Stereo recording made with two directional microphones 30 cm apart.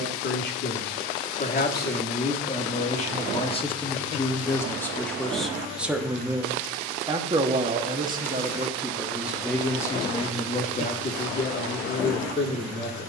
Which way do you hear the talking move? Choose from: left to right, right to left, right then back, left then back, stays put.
right then back.